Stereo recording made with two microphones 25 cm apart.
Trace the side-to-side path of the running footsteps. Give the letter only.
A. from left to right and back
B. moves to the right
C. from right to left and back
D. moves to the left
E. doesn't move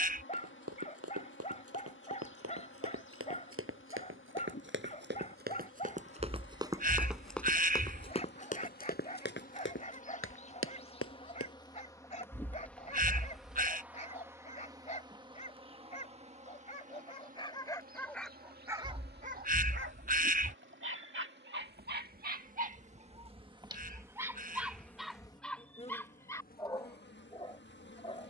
D.